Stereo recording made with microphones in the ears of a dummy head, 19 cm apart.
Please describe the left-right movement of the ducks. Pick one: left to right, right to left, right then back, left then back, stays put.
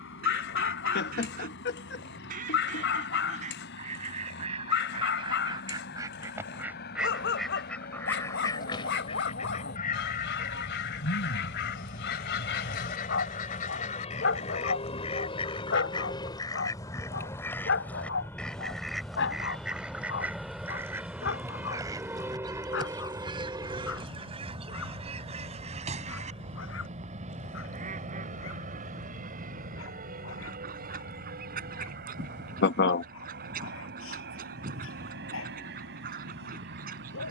left then back.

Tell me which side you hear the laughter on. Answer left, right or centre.
left.